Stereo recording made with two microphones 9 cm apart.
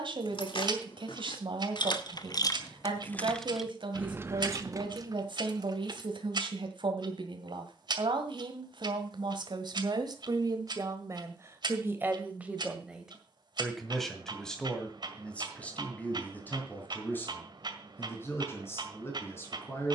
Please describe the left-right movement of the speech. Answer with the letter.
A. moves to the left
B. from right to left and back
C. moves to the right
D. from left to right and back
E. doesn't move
A.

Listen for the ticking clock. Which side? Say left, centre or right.
right.